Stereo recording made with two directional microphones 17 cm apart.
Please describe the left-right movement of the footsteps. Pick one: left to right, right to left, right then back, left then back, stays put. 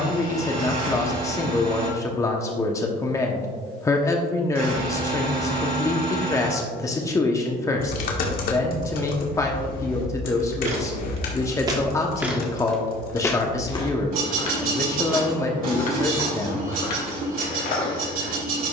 right to left.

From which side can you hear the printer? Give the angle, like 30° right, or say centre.
60° right.